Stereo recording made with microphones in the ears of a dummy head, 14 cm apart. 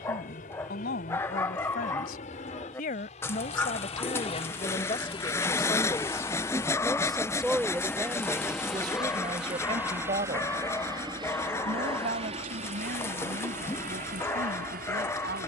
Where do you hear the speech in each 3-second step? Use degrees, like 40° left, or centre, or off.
60° left, 40° left, 10° right, 40° right, 60° right.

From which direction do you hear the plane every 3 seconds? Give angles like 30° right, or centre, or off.
50° left, 40° left, 10° left, 20° right, 40° right.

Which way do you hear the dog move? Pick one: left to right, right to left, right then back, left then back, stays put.
stays put.